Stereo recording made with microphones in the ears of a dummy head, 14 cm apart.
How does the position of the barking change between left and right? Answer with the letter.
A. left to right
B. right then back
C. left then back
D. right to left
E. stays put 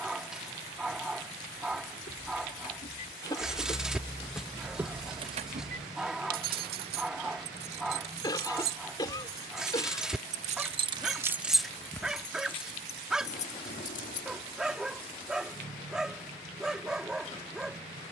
E.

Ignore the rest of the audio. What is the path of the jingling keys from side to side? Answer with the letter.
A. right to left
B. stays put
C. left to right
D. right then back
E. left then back
D.